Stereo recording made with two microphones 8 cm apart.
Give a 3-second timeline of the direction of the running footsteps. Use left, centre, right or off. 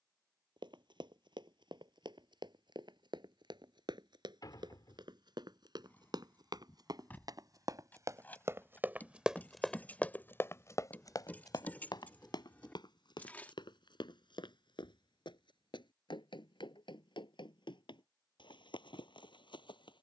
right, right, right, left, left, left, left.